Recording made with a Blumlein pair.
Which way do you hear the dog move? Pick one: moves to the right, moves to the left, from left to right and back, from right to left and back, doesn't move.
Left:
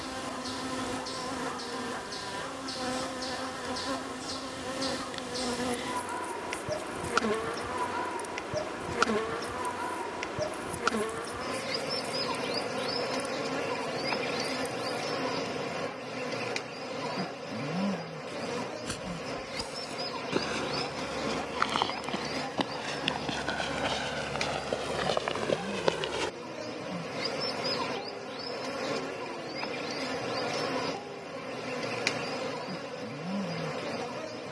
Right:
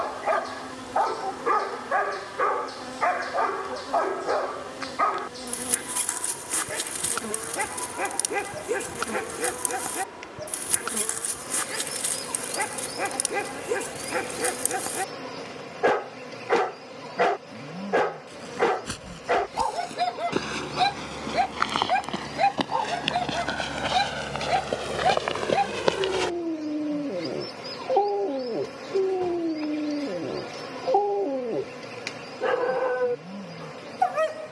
doesn't move.